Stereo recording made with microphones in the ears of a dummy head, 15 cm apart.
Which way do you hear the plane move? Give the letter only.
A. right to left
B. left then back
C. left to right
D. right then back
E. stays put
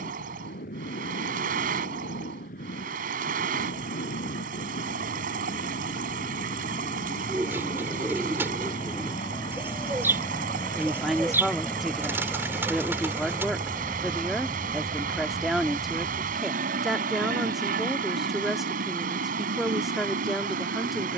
C.